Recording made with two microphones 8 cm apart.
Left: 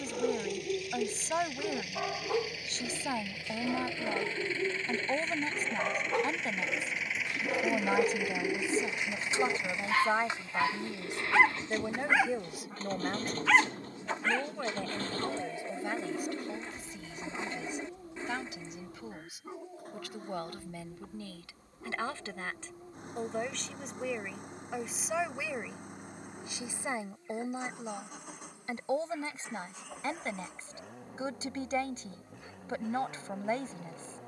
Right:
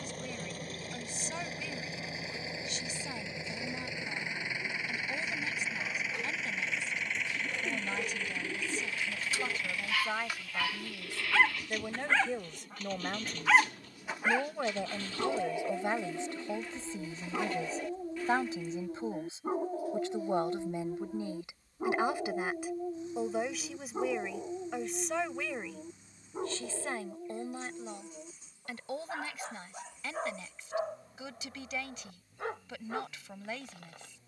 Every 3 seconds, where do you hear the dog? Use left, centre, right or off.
left, left, left, left, centre, right, right, right, right, right, right, right.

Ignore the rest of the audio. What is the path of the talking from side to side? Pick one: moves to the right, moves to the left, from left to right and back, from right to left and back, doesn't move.
from left to right and back.